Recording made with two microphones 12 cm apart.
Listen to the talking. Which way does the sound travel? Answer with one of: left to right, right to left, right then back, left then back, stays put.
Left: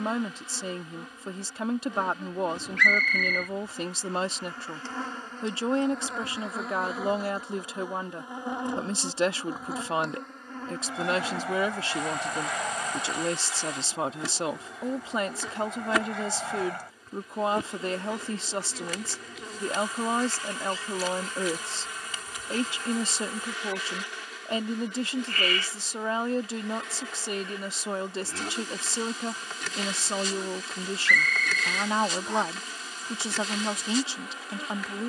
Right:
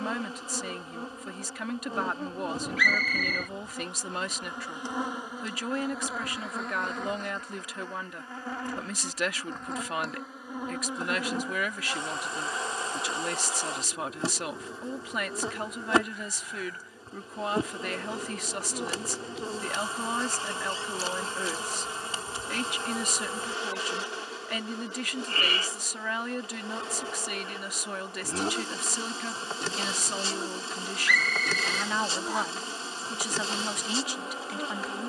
stays put.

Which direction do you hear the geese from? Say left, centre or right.
left.